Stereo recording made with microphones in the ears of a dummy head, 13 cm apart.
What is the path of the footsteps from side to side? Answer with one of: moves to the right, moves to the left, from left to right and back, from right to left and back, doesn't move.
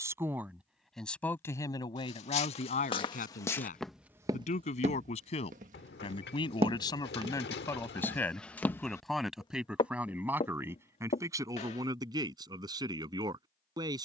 from left to right and back.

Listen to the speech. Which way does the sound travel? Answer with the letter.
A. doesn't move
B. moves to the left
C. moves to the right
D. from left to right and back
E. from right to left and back
E.